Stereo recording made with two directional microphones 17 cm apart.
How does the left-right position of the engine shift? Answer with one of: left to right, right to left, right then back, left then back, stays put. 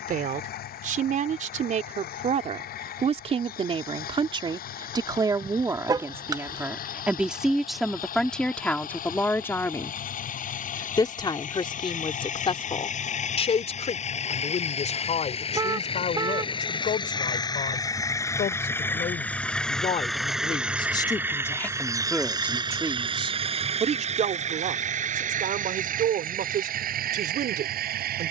left to right.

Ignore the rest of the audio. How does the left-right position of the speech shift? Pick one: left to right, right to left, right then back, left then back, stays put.
left then back.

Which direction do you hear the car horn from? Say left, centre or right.
right.